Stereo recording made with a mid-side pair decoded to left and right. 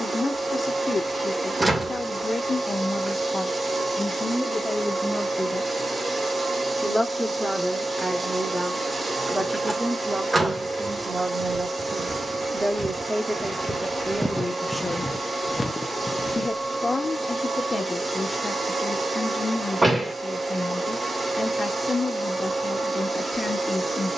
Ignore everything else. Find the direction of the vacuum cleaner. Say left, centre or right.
right.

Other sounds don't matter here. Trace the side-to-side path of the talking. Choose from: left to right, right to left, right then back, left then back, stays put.
right then back.